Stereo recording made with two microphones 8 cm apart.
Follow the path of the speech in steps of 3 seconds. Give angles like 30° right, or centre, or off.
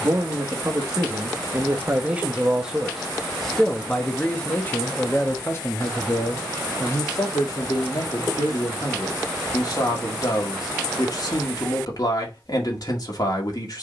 30° right, 20° left, 50° left, 50° left, 50° left.